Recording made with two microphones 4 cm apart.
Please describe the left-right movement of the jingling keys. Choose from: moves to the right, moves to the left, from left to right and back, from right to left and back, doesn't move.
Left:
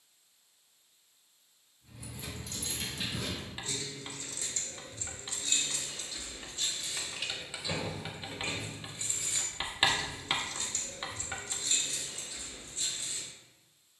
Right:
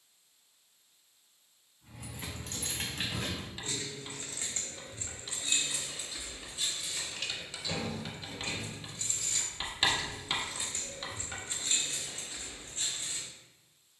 from right to left and back.